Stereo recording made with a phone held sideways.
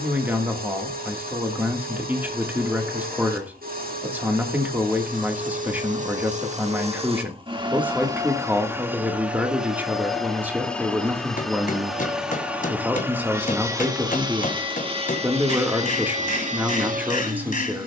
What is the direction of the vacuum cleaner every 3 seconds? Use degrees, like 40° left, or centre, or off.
60° right, 60° right, 30° right, centre, 20° right, 50° right.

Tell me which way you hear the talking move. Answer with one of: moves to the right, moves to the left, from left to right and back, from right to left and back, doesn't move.
doesn't move.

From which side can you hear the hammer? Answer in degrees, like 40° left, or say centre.
60° left.